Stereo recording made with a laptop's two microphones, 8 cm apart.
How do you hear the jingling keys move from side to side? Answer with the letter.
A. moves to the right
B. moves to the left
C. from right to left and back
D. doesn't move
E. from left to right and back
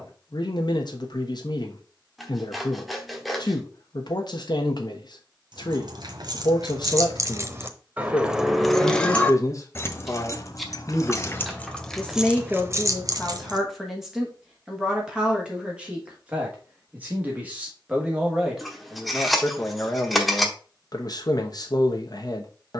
C.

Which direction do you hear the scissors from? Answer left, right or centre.
centre.